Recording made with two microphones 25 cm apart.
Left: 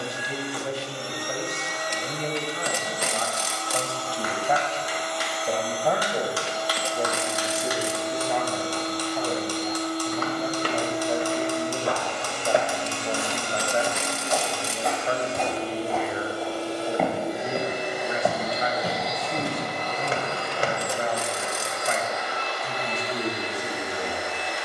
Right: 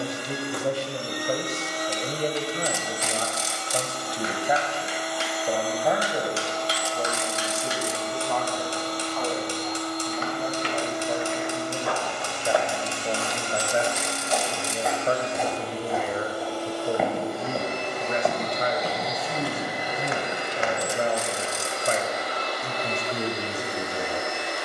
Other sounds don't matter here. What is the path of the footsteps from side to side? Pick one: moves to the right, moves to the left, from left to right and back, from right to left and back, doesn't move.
from left to right and back.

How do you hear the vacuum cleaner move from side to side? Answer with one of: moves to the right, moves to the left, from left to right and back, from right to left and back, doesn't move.
from right to left and back.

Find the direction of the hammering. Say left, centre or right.
right.